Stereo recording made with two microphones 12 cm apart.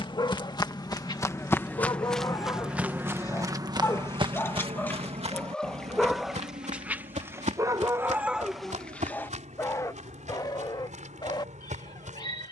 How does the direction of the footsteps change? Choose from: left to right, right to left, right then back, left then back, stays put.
left to right.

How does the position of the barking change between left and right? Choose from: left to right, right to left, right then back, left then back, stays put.
right then back.